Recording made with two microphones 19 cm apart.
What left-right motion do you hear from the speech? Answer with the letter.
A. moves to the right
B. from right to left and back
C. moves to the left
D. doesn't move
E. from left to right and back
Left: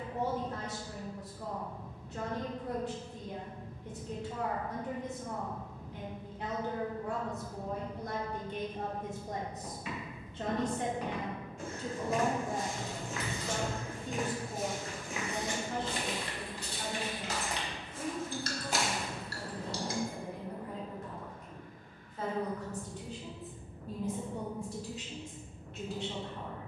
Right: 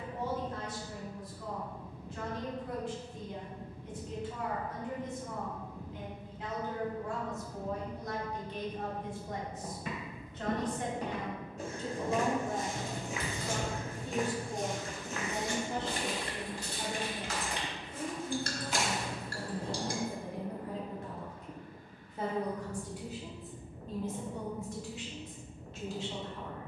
E.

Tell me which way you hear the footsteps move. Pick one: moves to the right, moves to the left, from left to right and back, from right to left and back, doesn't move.
moves to the left.